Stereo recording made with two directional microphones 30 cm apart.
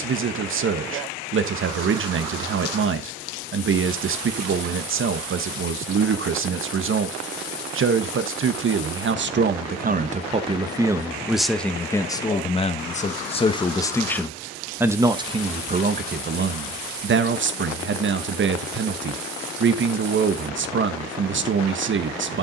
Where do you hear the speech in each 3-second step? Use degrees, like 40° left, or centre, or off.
40° right, 40° right, 40° right, 20° right, 10° left, 30° right, 40° right, 40° right.